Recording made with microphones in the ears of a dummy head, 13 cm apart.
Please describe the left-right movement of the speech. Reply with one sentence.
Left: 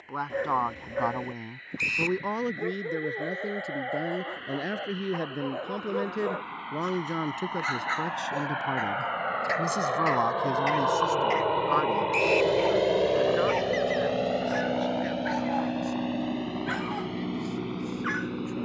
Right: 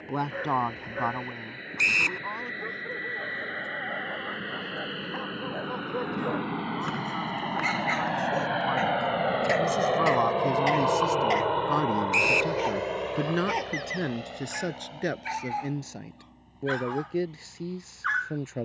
You can hear the speech move from right to left and back again.